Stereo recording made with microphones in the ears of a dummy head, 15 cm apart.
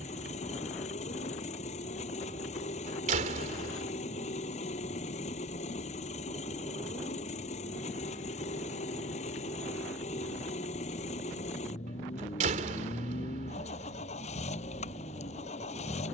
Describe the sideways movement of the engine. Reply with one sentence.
You can hear the engine stay in one place.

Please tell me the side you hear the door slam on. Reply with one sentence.
You can hear the door slam on the right.